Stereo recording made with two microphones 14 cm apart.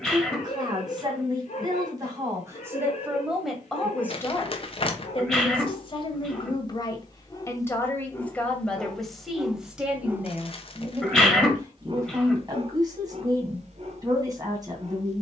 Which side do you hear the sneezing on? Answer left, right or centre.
centre.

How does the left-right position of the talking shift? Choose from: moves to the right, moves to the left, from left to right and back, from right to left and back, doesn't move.
from right to left and back.